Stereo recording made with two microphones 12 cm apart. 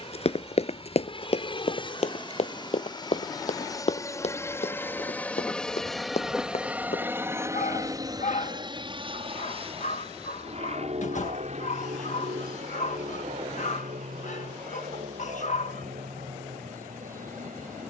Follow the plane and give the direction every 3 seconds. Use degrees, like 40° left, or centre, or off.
50° left, 20° left, 20° right, 50° right, 70° right, 70° right.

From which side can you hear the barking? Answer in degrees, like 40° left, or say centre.
80° left.